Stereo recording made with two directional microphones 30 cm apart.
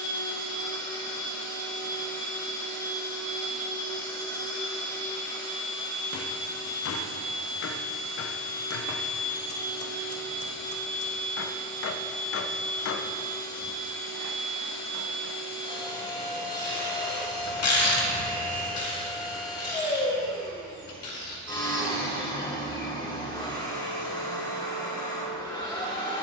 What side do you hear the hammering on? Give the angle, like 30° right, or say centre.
50° left.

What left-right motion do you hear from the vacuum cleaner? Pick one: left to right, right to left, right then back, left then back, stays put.
stays put.